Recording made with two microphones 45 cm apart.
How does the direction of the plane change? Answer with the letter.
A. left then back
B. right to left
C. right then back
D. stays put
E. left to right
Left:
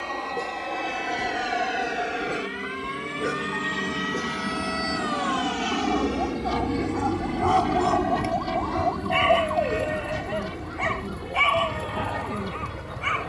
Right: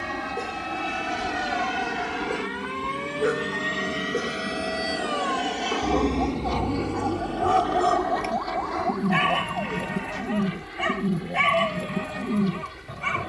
B.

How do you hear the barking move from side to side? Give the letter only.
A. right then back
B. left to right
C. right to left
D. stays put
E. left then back
B.